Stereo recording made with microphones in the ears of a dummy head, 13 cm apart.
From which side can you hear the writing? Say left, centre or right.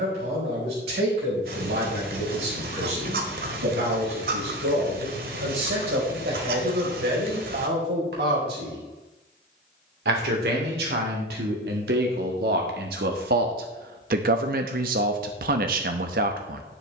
right.